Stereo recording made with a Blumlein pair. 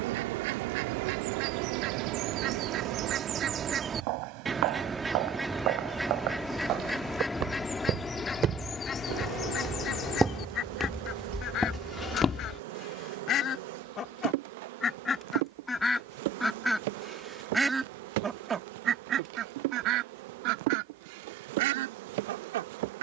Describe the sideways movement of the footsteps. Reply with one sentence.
In this clip you hear the footsteps travel towards the left.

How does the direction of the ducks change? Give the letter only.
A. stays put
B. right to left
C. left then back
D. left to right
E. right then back
C.